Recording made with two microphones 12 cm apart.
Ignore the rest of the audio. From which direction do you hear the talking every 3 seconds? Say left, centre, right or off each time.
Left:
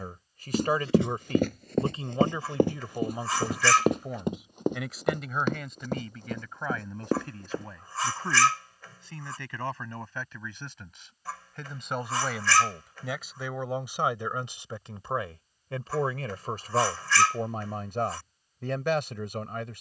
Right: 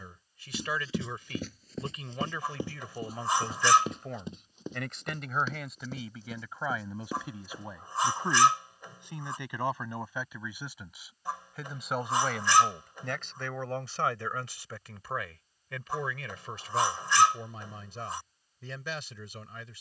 left, centre, centre, centre, centre, left, left.